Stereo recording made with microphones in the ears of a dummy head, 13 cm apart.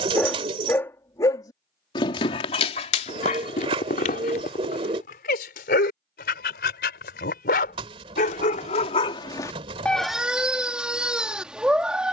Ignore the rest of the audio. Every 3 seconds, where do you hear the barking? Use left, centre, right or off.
left, left, left, centre.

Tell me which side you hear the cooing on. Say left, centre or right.
right.